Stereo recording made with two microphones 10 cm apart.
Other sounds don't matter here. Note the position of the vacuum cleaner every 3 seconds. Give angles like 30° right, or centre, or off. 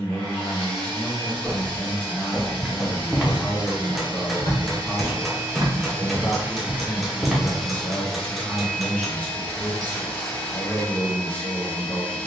60° right, 50° right, centre, 20° left.